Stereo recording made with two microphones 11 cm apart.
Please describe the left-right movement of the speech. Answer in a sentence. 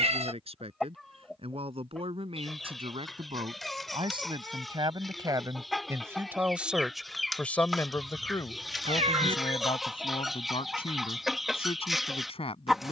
You can hear the speech move from right to left.